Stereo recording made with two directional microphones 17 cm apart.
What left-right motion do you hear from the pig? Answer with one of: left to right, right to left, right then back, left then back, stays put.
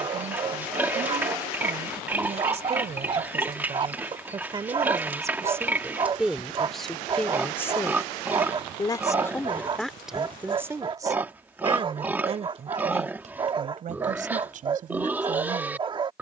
stays put.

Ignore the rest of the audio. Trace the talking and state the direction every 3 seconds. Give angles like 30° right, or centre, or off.
40° right, 30° right, 10° left, 10° right, 40° right, 50° right.